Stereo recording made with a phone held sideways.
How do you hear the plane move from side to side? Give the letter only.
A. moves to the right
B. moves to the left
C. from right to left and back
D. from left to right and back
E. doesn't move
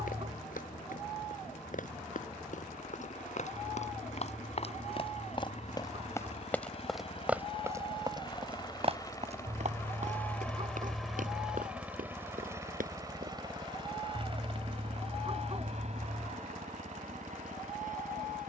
A.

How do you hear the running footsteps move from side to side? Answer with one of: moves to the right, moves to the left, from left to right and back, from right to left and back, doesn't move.
moves to the right.